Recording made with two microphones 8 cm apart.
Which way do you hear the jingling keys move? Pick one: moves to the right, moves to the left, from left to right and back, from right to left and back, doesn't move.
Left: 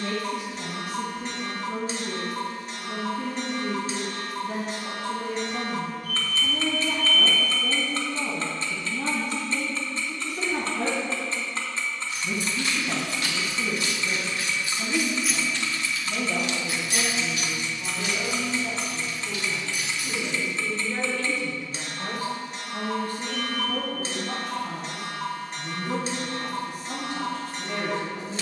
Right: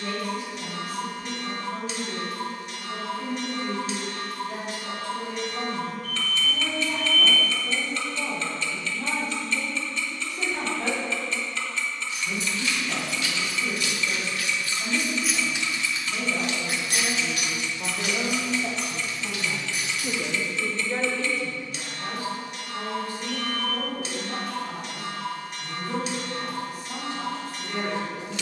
moves to the right.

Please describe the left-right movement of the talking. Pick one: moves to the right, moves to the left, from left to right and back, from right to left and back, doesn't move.
from left to right and back.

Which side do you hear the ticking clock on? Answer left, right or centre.
left.